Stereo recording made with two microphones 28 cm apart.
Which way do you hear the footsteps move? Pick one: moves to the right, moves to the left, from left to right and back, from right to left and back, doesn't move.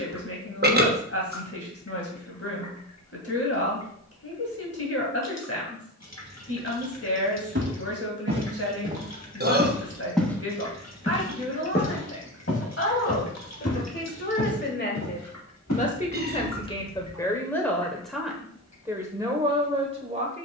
moves to the left.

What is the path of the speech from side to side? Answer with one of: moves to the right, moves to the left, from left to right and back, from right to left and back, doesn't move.
moves to the right.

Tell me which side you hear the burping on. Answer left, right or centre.
right.